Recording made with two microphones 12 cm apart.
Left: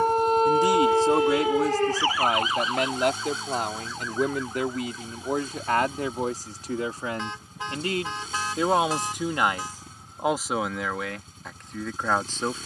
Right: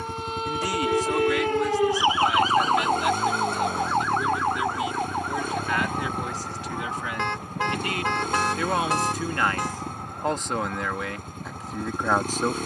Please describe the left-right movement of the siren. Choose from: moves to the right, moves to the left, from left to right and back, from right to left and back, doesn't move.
moves to the right.